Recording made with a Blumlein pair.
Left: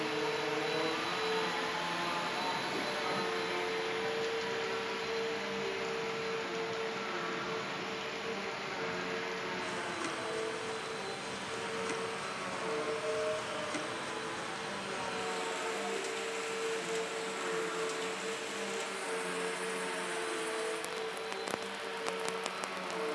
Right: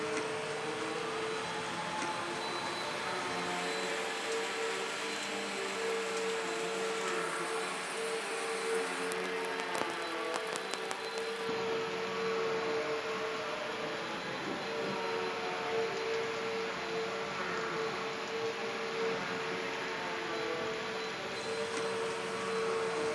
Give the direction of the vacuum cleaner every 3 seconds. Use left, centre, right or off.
left, centre, right, right, right, right, right, right.